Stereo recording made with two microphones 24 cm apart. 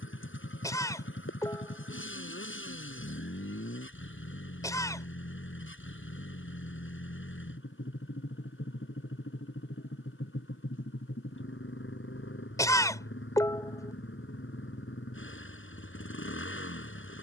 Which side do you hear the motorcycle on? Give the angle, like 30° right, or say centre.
60° left.